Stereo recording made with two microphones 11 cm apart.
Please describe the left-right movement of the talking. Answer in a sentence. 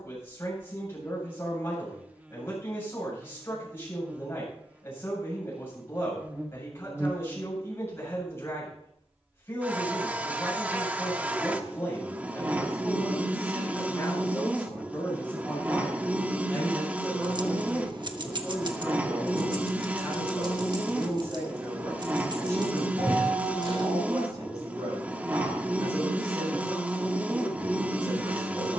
In this clip you hear the talking move from left to right.